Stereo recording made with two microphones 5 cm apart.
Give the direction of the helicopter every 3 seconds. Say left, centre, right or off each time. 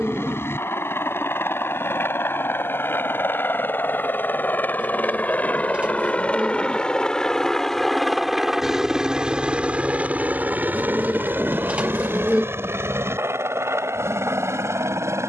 left, left, centre, right, right.